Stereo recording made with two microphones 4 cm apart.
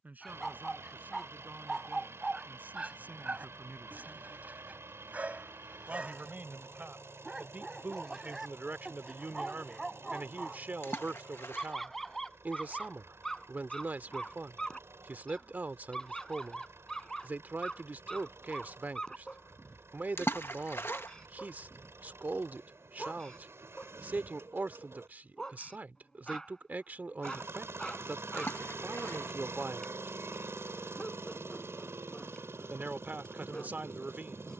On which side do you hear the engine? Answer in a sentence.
You can hear the engine on the right.